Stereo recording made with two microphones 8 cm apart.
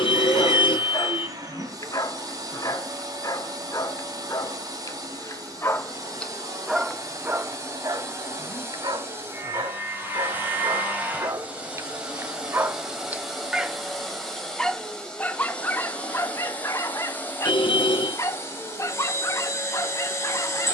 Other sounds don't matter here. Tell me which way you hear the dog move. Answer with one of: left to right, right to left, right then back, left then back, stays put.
right then back.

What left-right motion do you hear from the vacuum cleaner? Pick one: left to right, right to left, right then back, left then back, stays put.
right to left.